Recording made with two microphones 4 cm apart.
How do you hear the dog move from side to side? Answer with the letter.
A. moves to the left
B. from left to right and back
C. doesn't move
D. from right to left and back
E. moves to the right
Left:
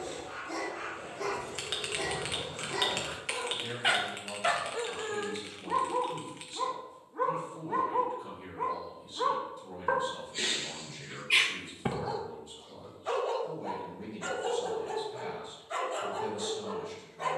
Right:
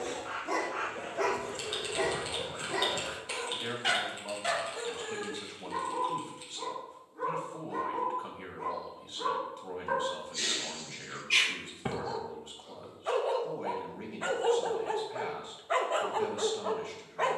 D.